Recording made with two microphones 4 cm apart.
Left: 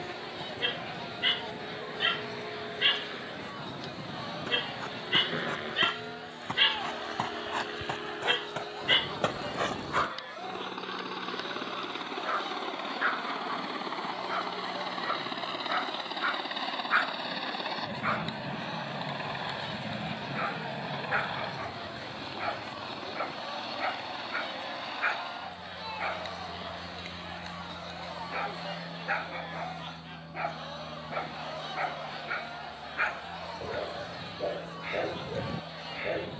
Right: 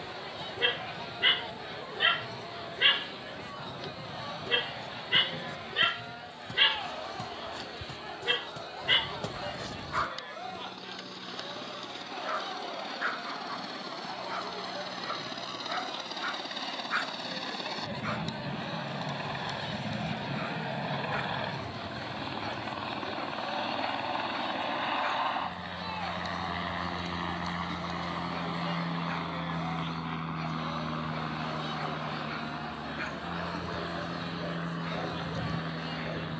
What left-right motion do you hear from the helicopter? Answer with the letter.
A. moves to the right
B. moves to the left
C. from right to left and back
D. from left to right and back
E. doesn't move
A.